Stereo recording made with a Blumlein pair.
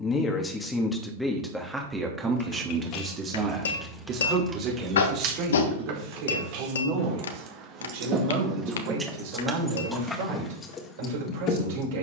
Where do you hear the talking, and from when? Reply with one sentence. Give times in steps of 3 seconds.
In this clip you hear the talking in the centre from 0 s and on the right from 3 s.